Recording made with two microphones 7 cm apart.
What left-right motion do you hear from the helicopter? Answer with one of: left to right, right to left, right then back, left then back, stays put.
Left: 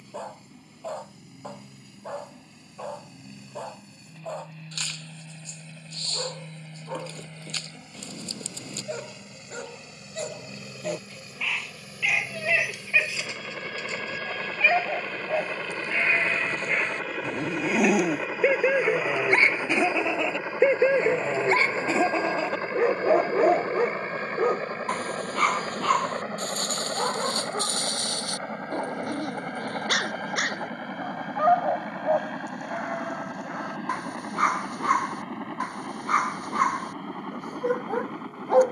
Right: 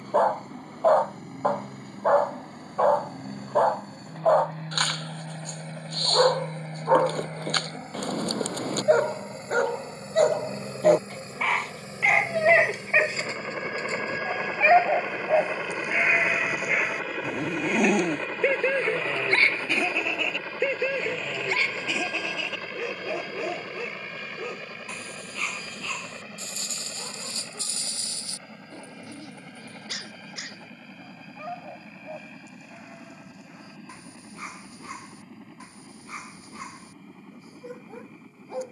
right to left.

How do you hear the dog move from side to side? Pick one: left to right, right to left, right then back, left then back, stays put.
right to left.